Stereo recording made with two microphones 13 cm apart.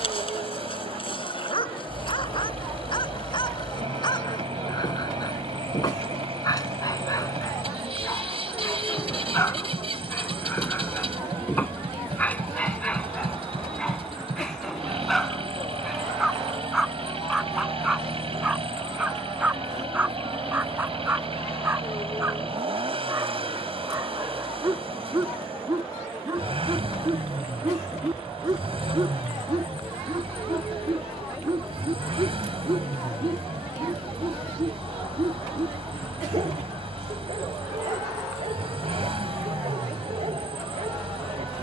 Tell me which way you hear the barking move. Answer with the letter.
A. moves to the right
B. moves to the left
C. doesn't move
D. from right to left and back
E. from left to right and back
A.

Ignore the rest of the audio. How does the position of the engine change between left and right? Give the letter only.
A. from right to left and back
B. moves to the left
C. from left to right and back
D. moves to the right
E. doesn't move
E.